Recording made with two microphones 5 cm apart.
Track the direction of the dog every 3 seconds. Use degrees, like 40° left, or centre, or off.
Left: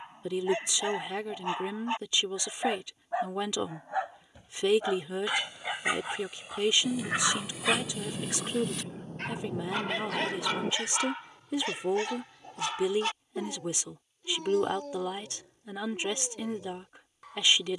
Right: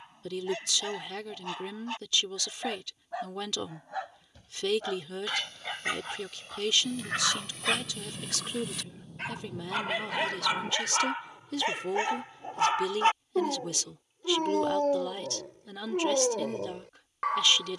20° left, 20° left, centre, 20° right, 40° right, 70° right.